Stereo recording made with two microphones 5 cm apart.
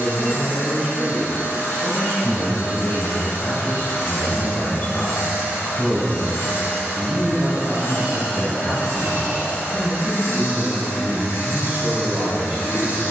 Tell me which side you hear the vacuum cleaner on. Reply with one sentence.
In this clip you hear the vacuum cleaner on the left.